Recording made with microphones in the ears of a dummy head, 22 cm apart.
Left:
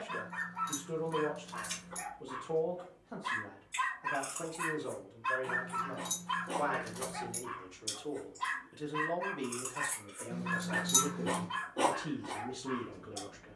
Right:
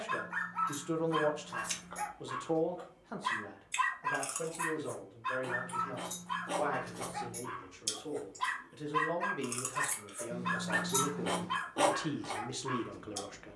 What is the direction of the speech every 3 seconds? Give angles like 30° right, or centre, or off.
60° right, 10° left, 10° left, 20° right, 50° right.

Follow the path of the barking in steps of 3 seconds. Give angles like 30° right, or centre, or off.
30° right, centre, 10° left, 30° right, 30° right.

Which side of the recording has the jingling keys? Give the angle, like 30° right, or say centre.
20° left.